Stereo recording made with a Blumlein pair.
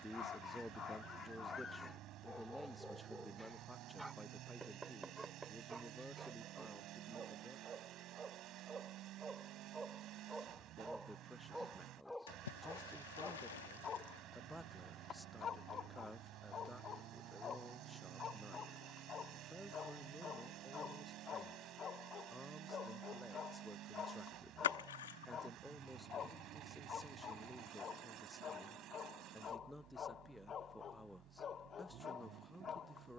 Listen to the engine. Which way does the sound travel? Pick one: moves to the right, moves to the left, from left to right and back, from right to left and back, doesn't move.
doesn't move.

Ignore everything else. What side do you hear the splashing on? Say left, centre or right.
left.